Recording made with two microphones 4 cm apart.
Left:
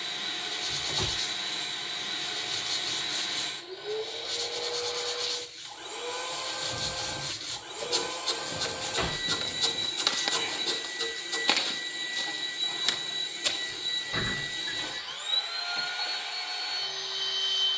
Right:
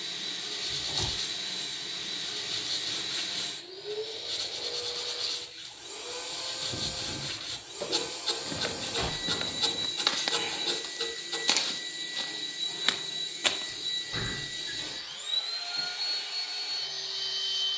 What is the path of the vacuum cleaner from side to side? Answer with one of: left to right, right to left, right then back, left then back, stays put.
stays put.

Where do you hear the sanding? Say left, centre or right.
centre.